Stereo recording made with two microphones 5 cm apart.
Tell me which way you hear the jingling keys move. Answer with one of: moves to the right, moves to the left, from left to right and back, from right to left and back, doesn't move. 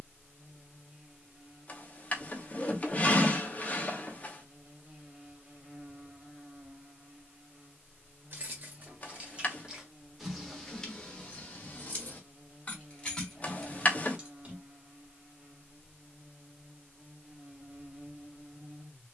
from right to left and back.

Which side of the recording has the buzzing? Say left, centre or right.
right.